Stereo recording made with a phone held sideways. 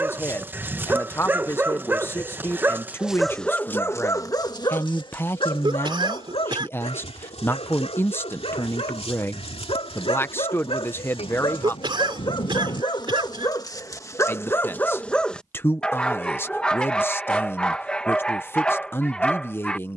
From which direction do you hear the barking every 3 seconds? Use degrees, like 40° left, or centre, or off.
10° right, 20° left, 50° left, 40° left, 30° left, 10° left, 10° left.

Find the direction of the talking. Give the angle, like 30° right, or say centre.
20° left.